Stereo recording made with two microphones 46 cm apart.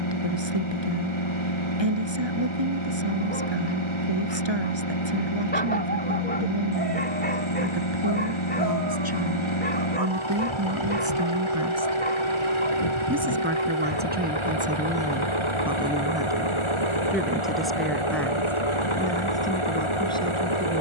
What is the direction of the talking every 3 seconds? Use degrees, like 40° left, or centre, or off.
60° right, 60° right, 50° right, 40° right, 20° right, 10° right, 10° left.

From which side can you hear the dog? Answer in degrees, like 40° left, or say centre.
20° left.